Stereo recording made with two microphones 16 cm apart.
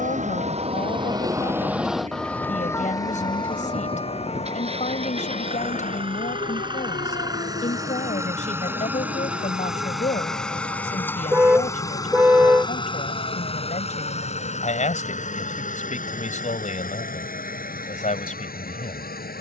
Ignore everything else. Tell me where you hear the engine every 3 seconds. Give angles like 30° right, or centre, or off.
50° right, 40° right, 20° right, centre, 40° left, 60° left, 70° left.